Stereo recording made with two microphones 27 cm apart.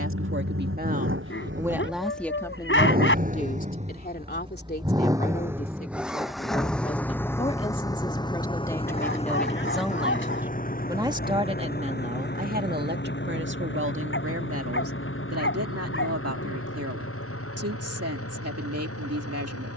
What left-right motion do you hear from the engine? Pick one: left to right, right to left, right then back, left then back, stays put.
right to left.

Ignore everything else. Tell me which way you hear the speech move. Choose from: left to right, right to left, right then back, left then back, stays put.
left then back.